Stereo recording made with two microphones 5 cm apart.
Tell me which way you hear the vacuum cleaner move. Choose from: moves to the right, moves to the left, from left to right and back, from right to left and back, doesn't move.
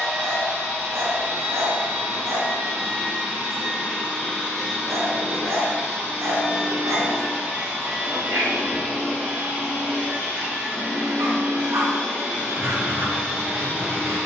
doesn't move.